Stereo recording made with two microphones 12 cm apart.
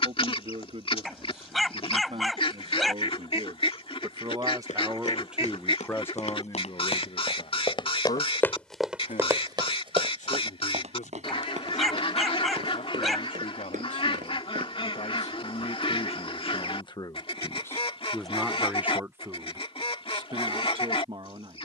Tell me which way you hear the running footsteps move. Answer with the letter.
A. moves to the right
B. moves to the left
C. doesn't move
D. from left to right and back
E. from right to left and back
A.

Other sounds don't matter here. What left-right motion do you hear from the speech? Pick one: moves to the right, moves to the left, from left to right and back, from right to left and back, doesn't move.
from right to left and back.